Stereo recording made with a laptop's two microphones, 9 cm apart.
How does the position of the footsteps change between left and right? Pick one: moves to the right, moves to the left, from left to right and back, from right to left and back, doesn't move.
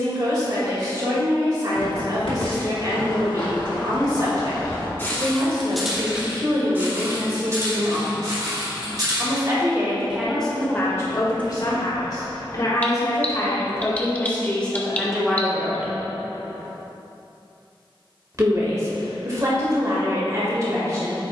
moves to the right.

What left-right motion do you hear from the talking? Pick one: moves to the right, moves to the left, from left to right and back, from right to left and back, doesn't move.
from right to left and back.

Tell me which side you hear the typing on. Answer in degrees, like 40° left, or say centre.
20° left.